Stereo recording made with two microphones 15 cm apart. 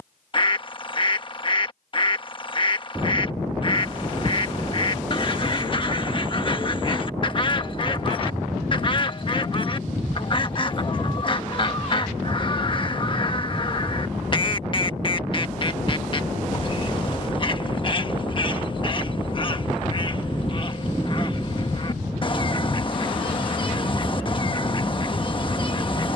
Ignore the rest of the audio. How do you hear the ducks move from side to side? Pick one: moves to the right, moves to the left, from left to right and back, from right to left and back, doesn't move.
doesn't move.